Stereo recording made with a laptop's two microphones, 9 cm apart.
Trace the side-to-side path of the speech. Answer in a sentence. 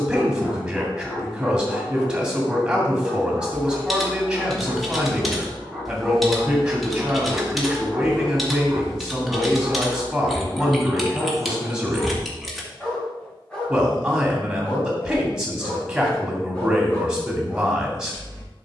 In this clip you hear the speech stay put.